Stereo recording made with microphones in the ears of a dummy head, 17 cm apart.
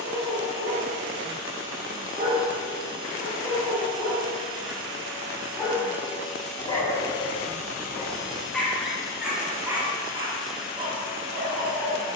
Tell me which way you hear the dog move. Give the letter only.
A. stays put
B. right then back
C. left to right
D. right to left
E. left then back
E.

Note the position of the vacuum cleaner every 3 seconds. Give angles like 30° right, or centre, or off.
30° right, 20° right, 30° left, 10° left.